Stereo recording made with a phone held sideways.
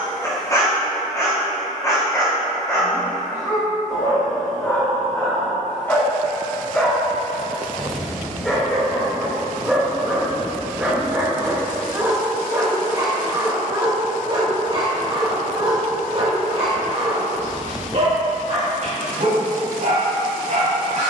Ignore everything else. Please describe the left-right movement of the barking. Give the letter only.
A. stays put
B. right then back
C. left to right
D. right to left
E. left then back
C.